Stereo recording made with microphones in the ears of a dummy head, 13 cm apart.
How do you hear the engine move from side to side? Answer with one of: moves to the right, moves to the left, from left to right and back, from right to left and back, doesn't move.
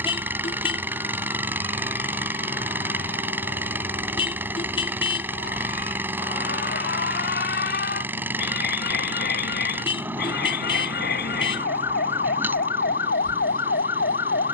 doesn't move.